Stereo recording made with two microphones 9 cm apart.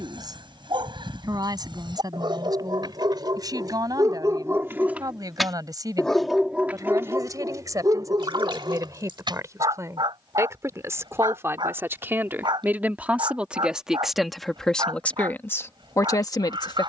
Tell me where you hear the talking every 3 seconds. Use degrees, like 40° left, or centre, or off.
50° right, 50° right, 40° right, 30° right, 10° right, 40° left.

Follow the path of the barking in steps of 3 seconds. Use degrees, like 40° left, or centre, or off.
60° right, 30° right, 30° right, 60° right, 60° right, 60° right.